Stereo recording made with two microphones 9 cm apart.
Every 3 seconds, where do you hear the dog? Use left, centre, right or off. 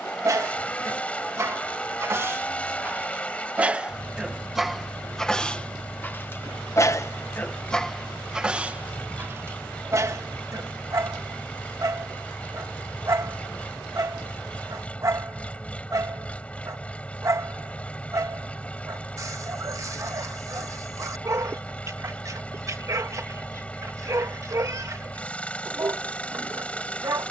right, centre, centre, right, right, right, right, right, right.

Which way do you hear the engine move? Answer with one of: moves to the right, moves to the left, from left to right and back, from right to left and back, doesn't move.
doesn't move.